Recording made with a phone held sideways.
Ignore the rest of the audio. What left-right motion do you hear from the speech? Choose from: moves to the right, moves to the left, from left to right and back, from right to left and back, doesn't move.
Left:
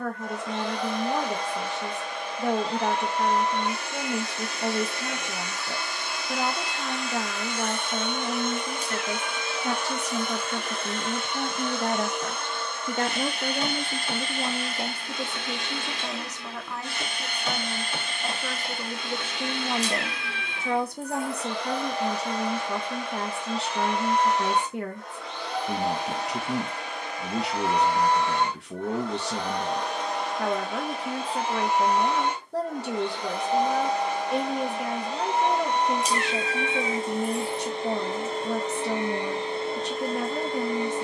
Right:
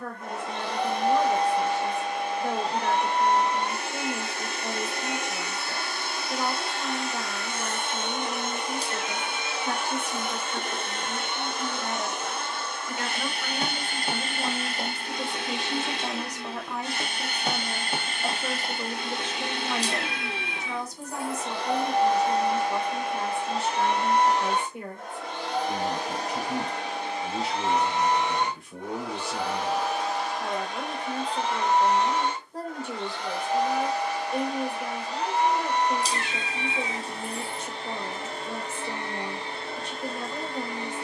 from left to right and back.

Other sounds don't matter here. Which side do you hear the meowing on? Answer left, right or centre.
right.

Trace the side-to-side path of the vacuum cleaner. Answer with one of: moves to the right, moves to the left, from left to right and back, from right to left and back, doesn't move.
moves to the left.